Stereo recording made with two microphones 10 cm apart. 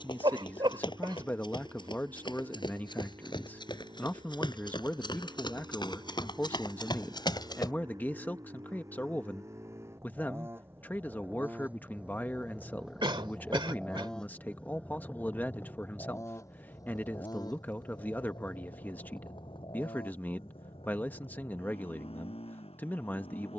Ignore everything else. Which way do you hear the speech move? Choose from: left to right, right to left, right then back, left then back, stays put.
stays put.